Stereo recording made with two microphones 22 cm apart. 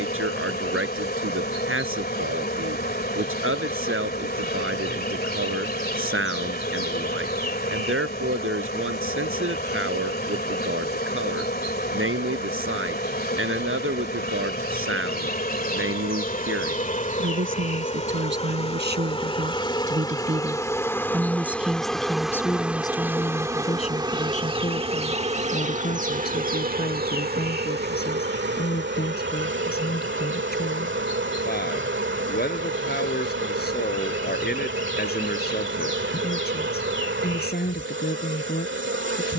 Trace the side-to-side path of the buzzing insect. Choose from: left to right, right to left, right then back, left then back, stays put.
left to right.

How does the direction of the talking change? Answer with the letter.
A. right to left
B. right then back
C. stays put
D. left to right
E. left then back
A.